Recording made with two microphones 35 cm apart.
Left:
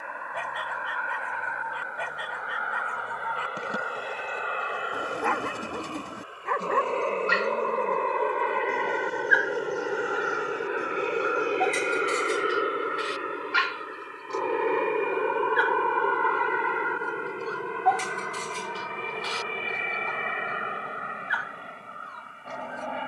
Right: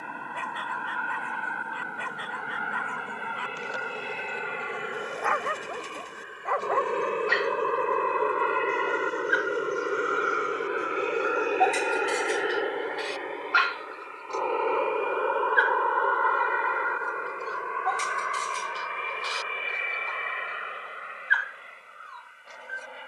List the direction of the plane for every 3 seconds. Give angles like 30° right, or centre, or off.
50° right, 40° right, 20° right, centre, 20° left, 40° left, 50° left, 60° left.